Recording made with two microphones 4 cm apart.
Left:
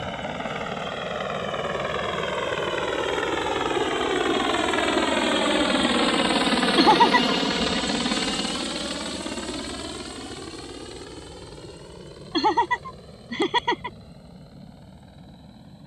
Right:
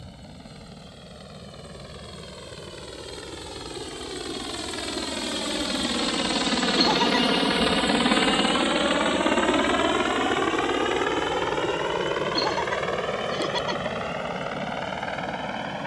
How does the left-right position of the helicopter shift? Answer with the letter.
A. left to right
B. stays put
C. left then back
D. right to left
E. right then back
A.